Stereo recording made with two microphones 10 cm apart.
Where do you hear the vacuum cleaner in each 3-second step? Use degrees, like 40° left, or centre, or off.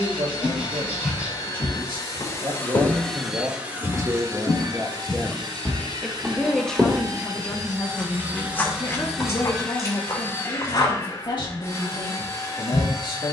40° left, 30° right, 30° right, 20° left, 30° left.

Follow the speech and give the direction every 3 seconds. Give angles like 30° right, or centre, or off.
60° right, 30° right, 20° left, 50° left, 50° left.